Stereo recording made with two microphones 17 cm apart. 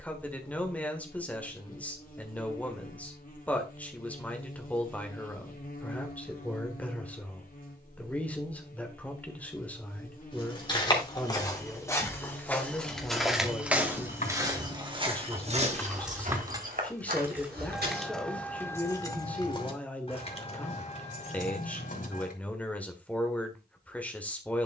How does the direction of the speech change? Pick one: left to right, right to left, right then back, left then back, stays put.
stays put.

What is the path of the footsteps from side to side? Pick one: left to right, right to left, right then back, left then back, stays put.
left to right.